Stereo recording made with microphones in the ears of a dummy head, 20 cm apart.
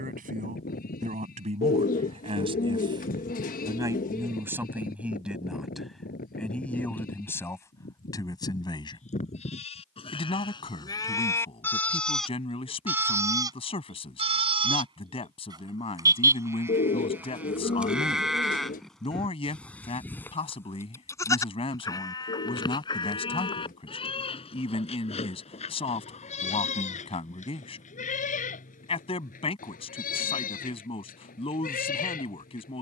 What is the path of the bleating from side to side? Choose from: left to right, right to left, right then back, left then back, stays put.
right then back.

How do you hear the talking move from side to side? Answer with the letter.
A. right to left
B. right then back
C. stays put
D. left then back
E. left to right
A.